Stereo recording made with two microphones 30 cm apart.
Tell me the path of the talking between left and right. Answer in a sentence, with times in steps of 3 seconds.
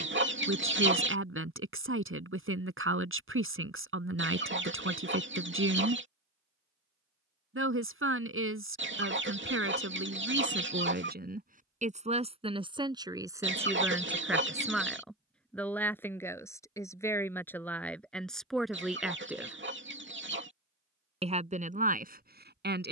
You can hear the talking on the right from 0 s, in the centre from 12 s and on the right from 21 s.